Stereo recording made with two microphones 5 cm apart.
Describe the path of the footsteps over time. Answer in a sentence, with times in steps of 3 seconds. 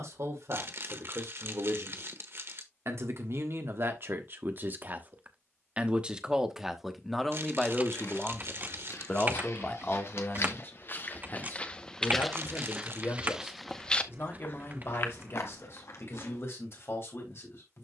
In this clip you hear the footsteps not at all from 0 s, on the left from 6 s, in the centre from 12 s and on the left from 15 s.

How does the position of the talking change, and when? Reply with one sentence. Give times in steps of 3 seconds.
In this clip you hear the talking on the right from 0 s, in the centre from 6 s and on the left from 9 s.